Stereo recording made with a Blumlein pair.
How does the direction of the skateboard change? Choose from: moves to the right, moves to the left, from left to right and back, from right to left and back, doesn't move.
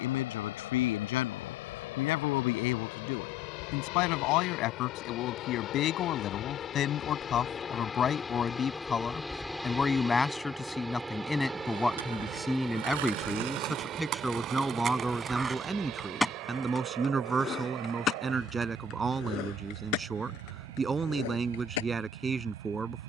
moves to the left.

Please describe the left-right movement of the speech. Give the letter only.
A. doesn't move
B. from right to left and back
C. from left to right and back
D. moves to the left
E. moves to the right
E.